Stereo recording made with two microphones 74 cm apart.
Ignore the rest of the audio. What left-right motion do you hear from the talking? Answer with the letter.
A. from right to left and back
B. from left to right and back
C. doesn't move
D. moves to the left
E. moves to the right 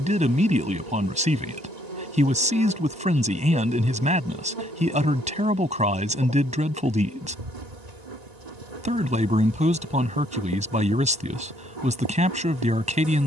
C.